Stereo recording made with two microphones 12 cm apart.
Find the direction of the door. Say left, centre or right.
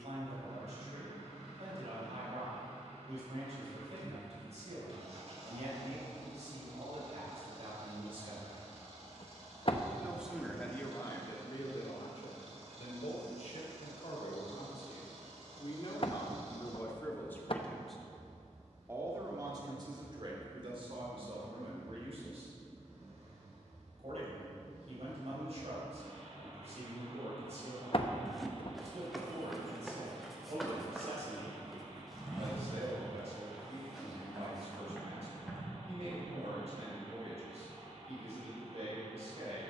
left.